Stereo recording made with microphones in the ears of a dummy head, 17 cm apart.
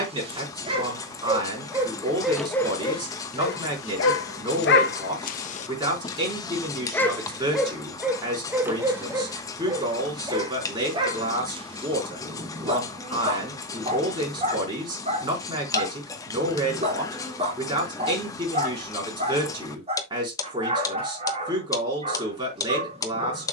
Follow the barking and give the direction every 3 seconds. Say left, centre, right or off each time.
centre, left, centre, right, right, right, right, right.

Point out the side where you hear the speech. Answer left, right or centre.
right.